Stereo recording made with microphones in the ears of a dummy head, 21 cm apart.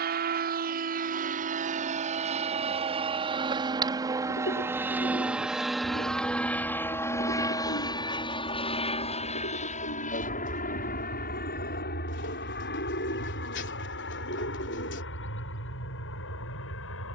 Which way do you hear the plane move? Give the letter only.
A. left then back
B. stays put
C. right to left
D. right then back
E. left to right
C.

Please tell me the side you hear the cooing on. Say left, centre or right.
left.